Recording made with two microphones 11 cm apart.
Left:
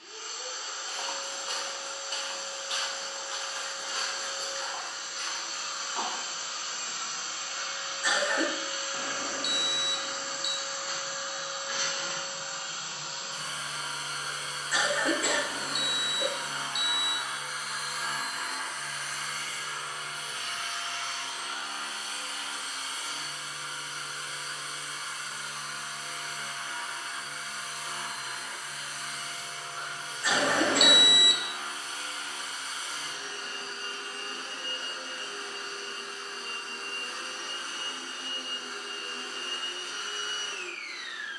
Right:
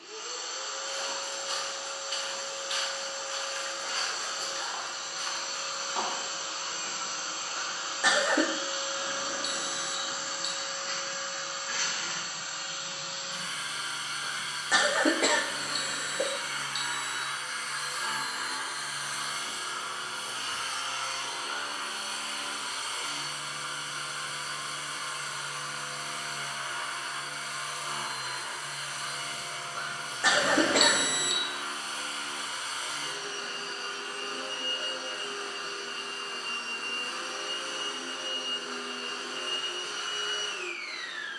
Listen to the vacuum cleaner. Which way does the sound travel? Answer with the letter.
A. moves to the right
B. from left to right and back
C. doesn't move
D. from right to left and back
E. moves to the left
D.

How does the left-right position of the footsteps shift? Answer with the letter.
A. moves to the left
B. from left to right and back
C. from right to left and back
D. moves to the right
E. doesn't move
D.